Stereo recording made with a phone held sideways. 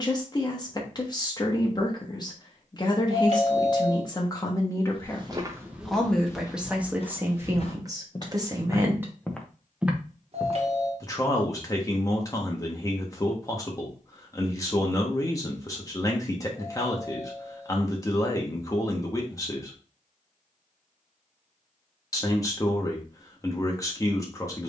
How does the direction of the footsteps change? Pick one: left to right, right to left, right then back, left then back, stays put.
left then back.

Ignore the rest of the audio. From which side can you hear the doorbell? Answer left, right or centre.
right.